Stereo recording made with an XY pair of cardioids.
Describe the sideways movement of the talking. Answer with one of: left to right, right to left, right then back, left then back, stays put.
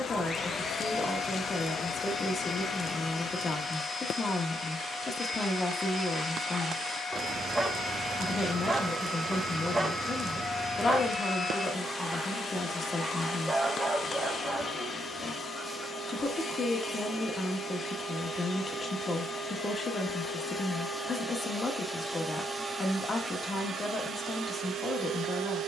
stays put.